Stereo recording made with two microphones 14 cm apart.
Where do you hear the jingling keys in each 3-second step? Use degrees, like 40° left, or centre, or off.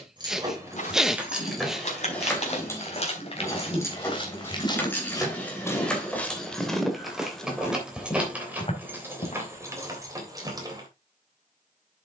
centre, 10° left, centre, 20° right.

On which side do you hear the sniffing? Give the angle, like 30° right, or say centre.
centre.